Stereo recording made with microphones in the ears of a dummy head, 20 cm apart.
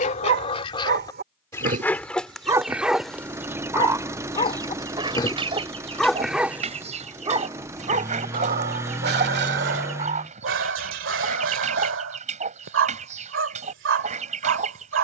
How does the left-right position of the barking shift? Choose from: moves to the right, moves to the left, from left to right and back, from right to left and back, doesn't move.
from right to left and back.